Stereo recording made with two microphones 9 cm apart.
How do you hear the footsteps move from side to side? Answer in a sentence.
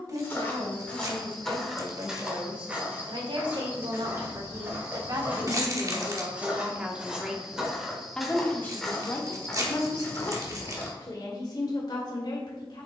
You can hear the footsteps move from left to right and back again.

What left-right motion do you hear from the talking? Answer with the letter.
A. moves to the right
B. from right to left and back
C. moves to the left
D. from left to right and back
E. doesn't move
C.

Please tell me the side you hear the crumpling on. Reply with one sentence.
In this clip you hear the crumpling on the right.